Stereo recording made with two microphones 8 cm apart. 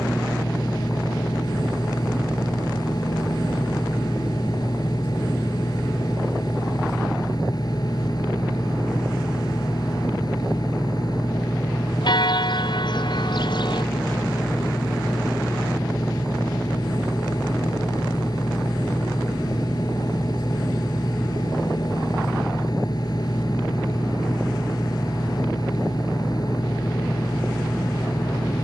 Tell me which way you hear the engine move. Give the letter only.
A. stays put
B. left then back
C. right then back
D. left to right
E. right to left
A.